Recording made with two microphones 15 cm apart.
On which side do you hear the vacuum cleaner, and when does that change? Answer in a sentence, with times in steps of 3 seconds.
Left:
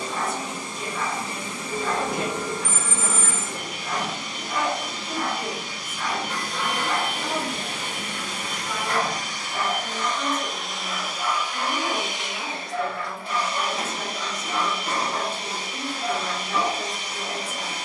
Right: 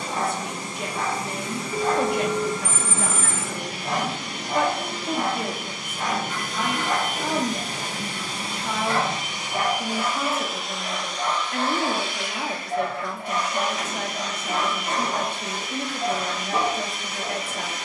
You can hear the vacuum cleaner on the right from 0 s, in the centre from 9 s and on the left from 12 s.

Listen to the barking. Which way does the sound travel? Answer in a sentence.
You can hear the barking stay in one place.